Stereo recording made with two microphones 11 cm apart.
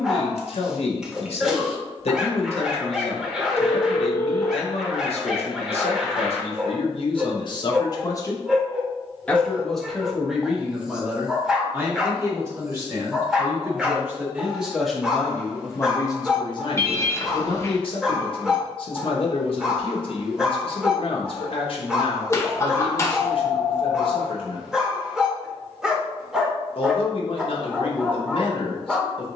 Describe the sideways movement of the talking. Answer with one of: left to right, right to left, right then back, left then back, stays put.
right then back.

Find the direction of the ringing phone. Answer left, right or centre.
left.